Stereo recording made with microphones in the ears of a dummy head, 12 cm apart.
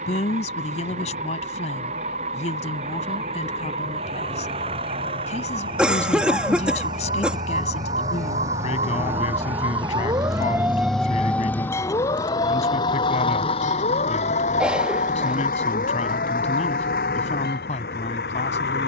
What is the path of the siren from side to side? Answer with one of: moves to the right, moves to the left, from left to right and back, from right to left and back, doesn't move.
moves to the left.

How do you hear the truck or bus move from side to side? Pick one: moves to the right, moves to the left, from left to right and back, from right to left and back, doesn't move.
moves to the left.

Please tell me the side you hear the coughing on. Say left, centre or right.
centre.